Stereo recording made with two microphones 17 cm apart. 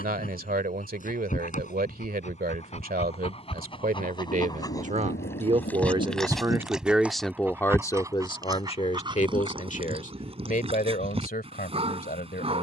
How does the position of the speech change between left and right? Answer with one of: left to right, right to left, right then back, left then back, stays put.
right to left.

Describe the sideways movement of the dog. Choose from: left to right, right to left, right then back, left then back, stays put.
left to right.